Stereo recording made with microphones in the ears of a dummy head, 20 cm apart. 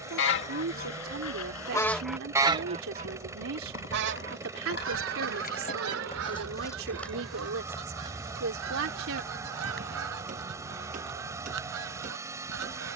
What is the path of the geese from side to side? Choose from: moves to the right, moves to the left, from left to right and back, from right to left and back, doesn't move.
moves to the right.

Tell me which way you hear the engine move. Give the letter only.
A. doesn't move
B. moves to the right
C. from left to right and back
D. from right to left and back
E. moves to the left
A.